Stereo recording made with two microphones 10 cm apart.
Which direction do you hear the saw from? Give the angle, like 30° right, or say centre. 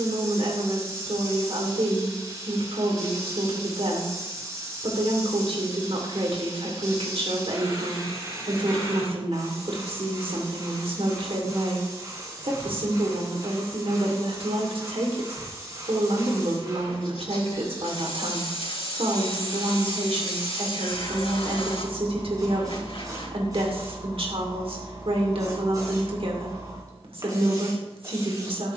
70° left.